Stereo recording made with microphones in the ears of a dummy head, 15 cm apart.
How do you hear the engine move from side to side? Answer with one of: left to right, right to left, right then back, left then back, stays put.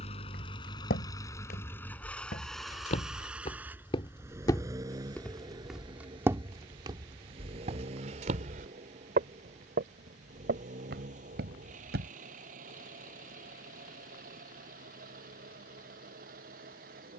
left to right.